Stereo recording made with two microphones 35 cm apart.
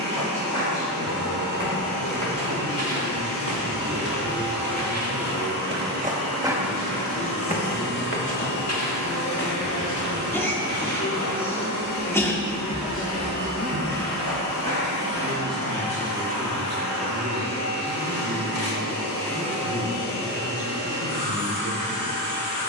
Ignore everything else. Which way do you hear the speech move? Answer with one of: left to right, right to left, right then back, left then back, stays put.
left to right.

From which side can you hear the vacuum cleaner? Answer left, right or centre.
left.